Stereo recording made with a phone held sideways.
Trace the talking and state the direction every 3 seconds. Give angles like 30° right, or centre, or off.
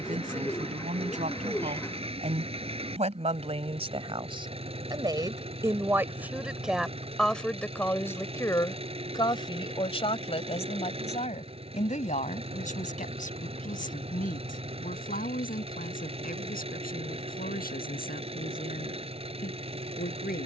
60° right, 30° right, 10° left, 40° left, 60° left, 70° left, 70° left.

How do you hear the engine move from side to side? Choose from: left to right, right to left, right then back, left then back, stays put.
stays put.